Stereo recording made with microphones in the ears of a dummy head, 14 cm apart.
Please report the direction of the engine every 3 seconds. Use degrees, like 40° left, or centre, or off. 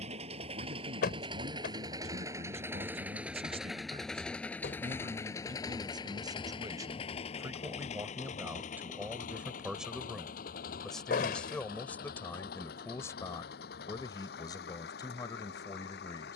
30° right, 10° left, 40° left, 60° left, 70° left, 70° left.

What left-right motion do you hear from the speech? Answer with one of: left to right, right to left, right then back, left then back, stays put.
right to left.